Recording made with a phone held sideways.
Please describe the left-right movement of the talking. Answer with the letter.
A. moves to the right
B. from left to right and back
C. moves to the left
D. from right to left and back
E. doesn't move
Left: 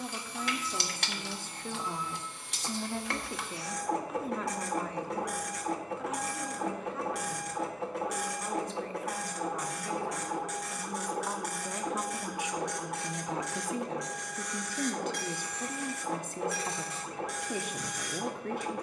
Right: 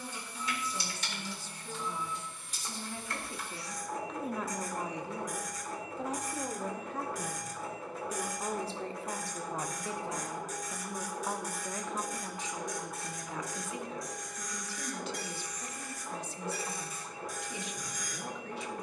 B.